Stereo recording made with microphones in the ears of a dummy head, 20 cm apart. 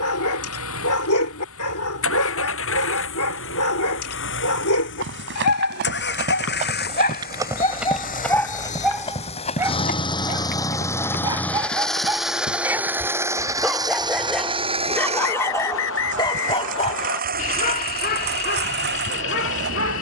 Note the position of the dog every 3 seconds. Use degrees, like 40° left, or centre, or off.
70° left, 70° left, 20° left, 10° right, centre, 20° left, 50° left.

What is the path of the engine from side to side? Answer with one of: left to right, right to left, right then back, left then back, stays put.
left to right.